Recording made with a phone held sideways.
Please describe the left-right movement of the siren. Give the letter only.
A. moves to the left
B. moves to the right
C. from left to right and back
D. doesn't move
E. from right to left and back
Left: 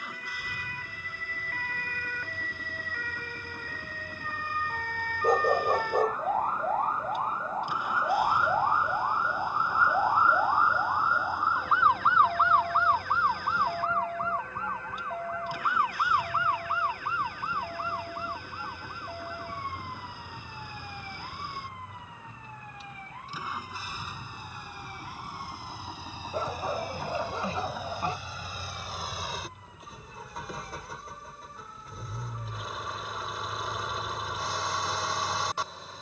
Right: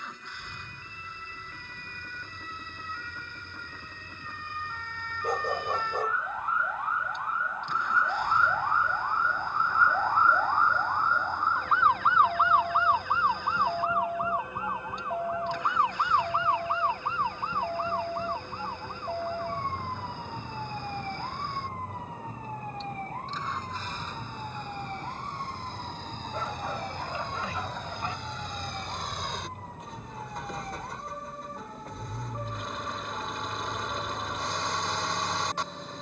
B.